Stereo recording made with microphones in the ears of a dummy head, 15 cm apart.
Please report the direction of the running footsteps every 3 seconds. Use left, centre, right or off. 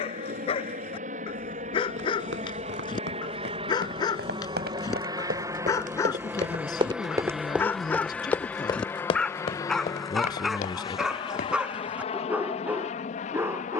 right, right, centre, left, off.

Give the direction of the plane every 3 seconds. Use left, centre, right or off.
right, right, centre, left, left.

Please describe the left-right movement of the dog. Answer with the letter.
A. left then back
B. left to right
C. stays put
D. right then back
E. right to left
B.